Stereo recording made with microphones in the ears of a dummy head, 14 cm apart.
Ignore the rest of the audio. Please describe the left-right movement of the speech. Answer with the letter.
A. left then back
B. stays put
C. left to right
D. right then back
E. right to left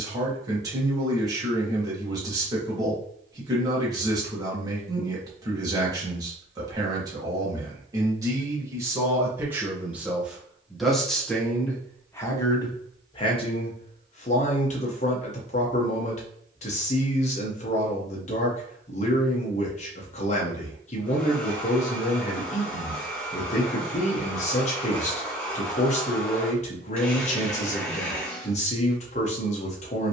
E.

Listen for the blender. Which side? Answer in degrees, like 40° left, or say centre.
10° left.